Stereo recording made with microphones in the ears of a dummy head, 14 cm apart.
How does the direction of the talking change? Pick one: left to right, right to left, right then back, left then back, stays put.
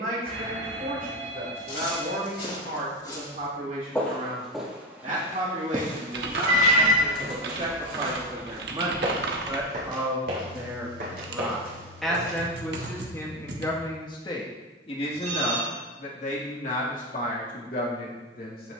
right to left.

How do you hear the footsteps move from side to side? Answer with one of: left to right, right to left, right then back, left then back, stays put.
left to right.